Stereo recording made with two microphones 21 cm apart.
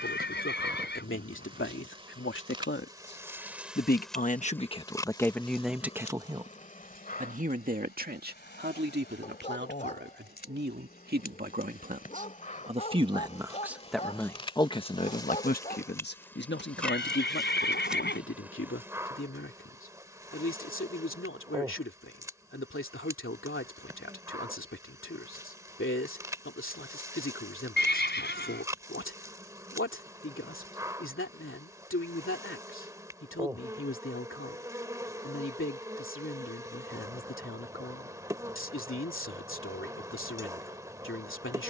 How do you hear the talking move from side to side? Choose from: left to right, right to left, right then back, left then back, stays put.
right then back.